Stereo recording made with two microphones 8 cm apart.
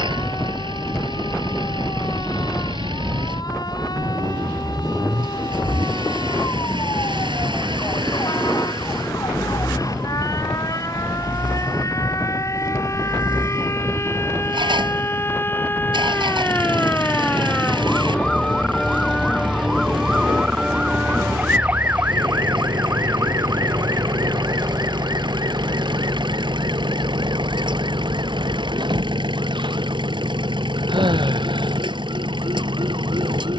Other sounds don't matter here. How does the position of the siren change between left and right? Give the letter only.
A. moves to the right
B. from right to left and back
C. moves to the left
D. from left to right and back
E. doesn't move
A.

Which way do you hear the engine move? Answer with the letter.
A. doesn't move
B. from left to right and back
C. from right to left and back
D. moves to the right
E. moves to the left
A.